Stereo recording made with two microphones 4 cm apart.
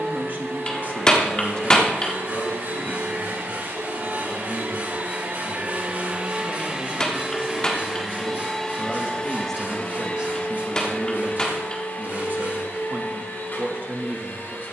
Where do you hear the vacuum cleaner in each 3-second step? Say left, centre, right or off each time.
right, right, centre, left, left.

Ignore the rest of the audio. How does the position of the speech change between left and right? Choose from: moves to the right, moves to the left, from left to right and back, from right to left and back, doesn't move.
from right to left and back.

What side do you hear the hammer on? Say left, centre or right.
left.